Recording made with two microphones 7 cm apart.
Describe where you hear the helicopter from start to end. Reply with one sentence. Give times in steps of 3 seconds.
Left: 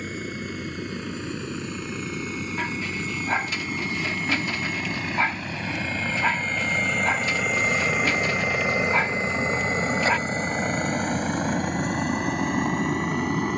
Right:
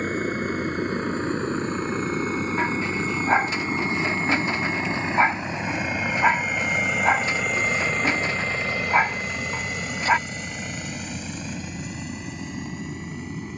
In this clip you hear the helicopter on the right from 0 s, in the centre from 6 s and on the left from 9 s.